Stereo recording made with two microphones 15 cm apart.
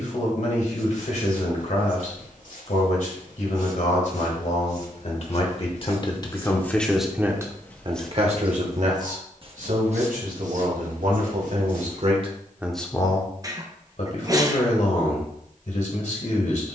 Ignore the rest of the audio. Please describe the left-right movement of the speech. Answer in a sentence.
In this clip you hear the speech move from left to right and back again.